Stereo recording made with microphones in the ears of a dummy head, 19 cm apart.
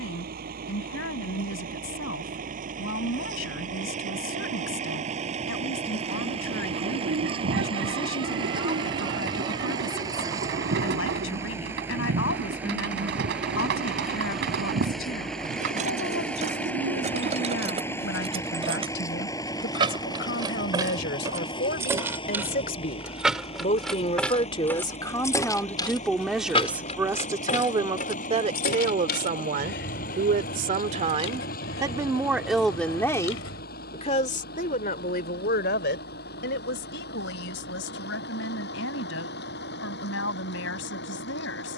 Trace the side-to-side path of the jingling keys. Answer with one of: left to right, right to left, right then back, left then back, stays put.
right to left.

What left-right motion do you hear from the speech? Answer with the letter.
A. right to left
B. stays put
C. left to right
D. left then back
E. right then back
E.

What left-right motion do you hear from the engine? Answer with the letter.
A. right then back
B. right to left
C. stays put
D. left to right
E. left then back
B.